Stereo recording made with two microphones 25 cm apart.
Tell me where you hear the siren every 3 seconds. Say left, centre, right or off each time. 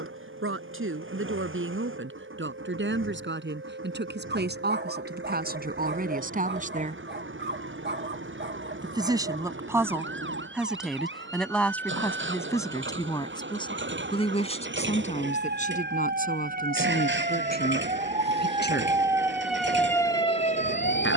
right, right, right, right, right, right, centre.